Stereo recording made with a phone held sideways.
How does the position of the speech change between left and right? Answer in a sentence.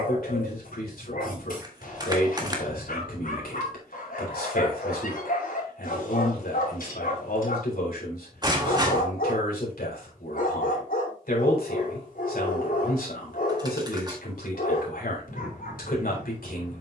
In this clip you hear the speech stay put.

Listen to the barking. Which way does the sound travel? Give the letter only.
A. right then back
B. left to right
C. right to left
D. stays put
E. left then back
D.